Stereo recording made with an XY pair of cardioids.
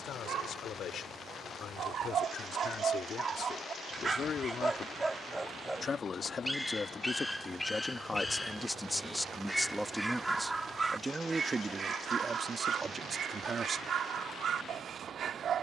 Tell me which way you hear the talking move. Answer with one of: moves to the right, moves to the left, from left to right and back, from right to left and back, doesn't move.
moves to the right.